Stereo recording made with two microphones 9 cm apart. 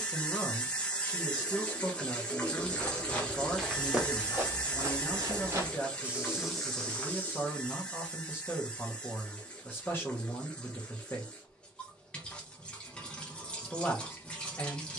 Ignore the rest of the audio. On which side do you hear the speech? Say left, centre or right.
left.